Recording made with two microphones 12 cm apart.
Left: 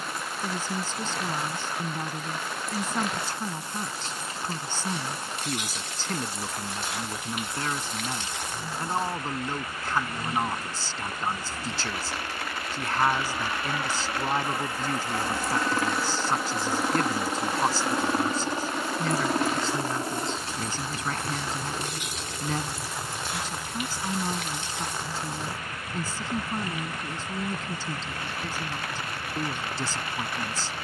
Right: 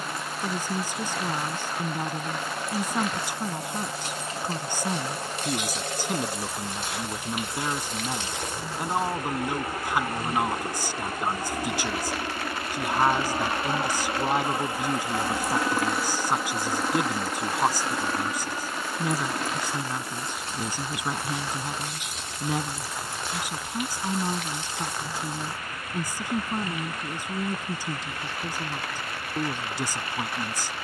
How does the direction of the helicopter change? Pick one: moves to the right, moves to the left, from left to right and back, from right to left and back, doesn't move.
moves to the left.